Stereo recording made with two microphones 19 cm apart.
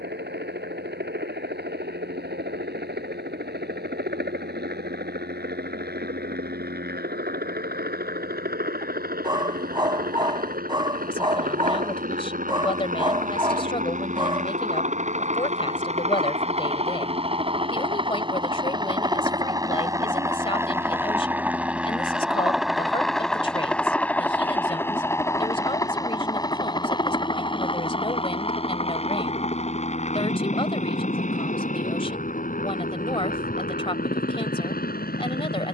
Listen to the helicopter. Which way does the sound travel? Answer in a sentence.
You can hear the helicopter move from right to left.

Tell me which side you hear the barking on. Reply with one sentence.
In this clip you hear the barking on the right.